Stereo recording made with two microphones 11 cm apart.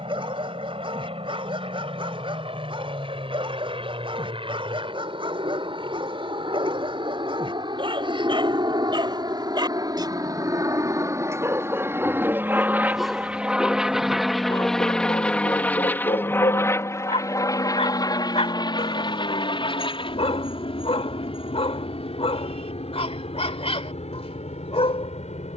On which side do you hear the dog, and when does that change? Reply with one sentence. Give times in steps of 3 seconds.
You can hear the dog on the right from 0 s, in the centre from 12 s and on the left from 15 s.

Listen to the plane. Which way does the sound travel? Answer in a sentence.
You can hear the plane move from right to left.